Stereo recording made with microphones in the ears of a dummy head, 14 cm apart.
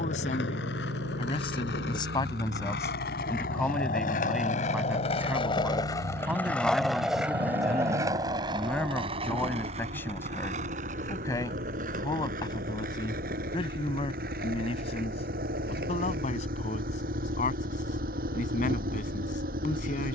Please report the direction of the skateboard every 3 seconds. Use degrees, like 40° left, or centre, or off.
70° left, 50° left, 10° right, 50° right, 60° right, 60° right, off.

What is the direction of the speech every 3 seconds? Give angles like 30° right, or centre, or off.
30° left, centre, centre, 20° left, 30° left, 50° left, 50° left.